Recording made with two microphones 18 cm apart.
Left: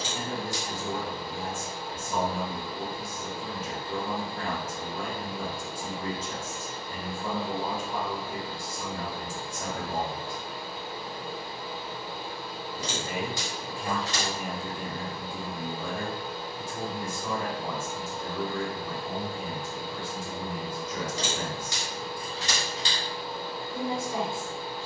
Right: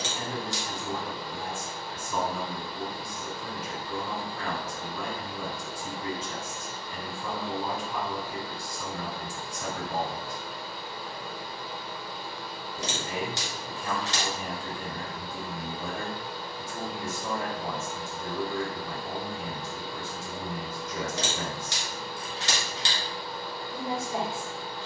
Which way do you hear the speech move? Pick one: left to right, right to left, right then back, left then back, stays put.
left to right.